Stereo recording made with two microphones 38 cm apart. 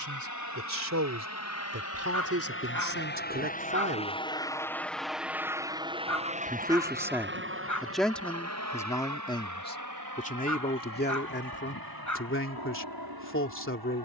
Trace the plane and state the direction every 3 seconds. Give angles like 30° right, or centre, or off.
40° left, 10° left, 30° right, 50° right, 60° right.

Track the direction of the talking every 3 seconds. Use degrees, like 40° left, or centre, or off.
40° right, 30° right, centre, 20° left, 30° left.